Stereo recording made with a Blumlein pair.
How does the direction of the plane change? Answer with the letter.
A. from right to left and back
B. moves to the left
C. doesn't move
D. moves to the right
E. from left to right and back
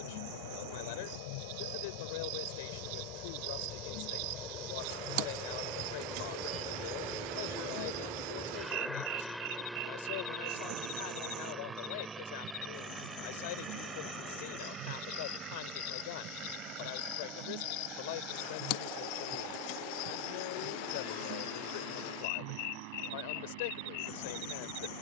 D.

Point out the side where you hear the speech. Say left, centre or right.
left.